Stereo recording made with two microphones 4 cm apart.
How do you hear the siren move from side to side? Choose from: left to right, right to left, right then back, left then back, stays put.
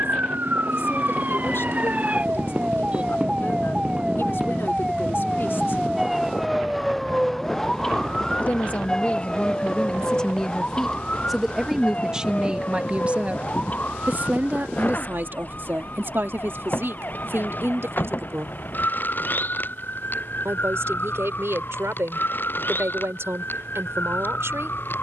right to left.